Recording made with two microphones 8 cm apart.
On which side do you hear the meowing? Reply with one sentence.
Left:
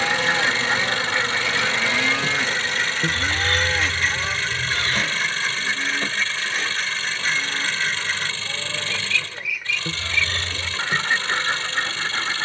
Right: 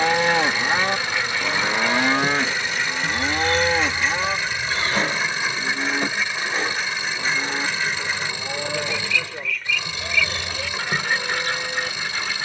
You can hear the meowing on the left.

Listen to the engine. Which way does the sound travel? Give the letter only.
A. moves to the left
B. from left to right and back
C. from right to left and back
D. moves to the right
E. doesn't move
E.